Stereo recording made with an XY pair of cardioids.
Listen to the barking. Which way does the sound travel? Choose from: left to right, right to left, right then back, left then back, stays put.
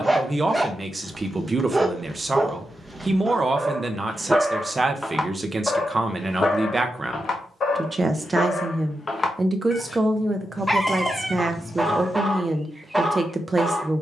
left then back.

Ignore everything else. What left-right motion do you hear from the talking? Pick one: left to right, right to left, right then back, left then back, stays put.
stays put.